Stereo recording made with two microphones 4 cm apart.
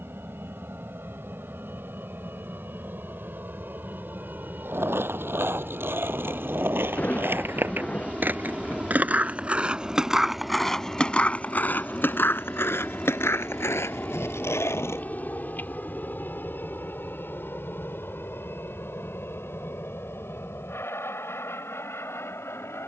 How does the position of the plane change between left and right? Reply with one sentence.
In this clip you hear the plane move to the left.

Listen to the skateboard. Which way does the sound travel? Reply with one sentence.
In this clip you hear the skateboard move to the left.